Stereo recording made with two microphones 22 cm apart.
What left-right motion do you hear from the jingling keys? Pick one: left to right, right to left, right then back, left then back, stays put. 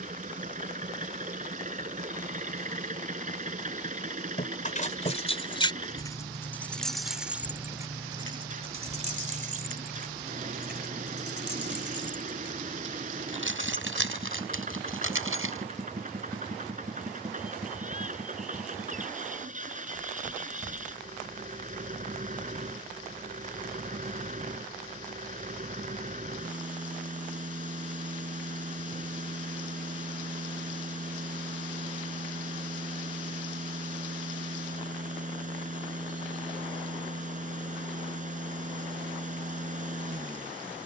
left to right.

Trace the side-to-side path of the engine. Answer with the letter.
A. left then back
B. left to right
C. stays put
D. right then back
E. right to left
C.